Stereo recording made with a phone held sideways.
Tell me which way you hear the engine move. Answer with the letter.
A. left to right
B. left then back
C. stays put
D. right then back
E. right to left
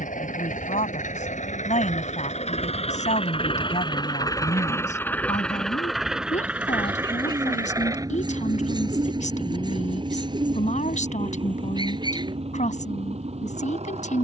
A.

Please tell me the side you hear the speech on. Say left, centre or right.
left.